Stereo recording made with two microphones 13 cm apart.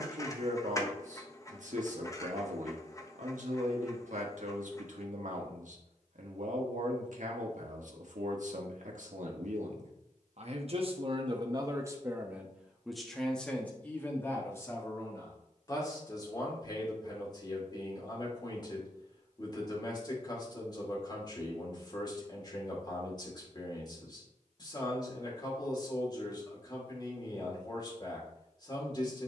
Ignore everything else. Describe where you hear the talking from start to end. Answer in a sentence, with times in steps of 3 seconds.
You can hear the talking on the right from 0 s, in the centre from 12 s and on the left from 15 s.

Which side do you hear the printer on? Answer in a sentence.
In this clip you hear the printer on the left.